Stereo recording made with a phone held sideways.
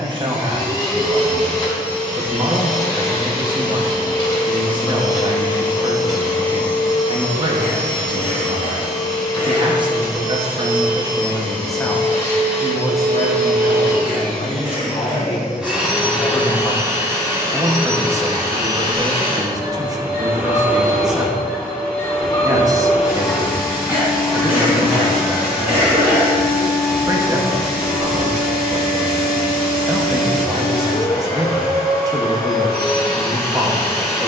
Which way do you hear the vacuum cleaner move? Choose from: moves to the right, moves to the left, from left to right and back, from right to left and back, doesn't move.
from left to right and back.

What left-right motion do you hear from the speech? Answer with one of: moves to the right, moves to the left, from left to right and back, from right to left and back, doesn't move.
from right to left and back.